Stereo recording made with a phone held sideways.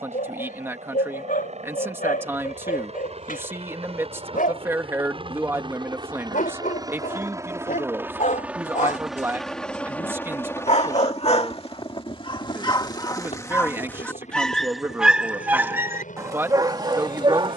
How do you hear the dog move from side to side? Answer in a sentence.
In this clip you hear the dog move to the right.